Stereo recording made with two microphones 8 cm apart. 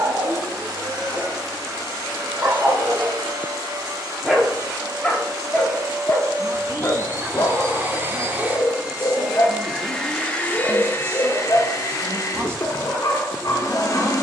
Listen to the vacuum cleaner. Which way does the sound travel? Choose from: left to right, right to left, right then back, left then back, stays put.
right to left.